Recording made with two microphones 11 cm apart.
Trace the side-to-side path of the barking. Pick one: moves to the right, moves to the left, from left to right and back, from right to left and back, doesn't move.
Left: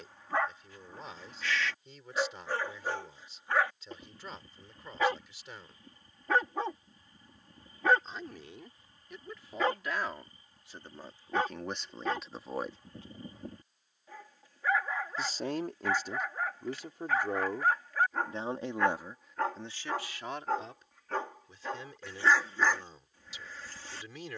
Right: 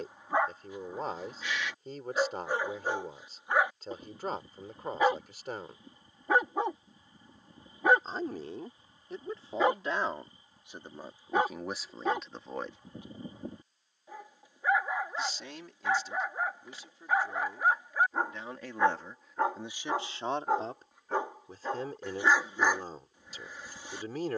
doesn't move.